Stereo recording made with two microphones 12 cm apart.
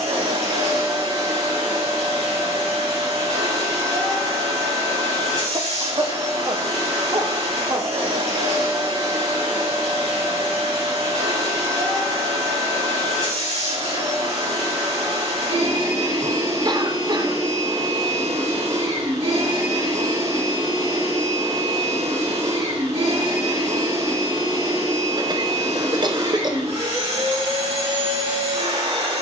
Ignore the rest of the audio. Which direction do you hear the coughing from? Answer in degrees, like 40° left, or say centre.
40° right.